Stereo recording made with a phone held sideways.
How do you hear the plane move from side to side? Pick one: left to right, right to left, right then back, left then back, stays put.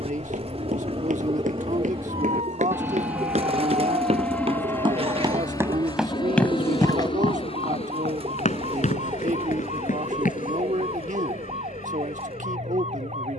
right to left.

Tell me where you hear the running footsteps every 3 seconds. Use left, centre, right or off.
right, right, left, left, off.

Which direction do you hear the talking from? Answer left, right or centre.
right.